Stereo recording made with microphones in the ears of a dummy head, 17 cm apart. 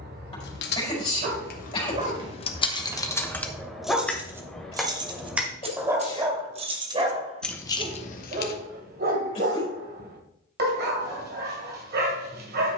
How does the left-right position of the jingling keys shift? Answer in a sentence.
You can hear the jingling keys go right and come back.